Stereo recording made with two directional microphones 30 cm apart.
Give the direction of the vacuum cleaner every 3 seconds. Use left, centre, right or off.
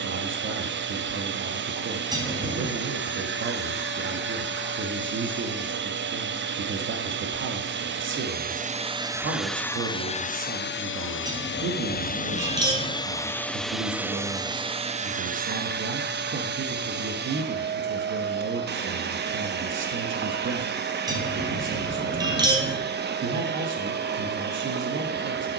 right, right, right, left, centre, right, right, right, right.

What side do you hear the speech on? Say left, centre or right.
right.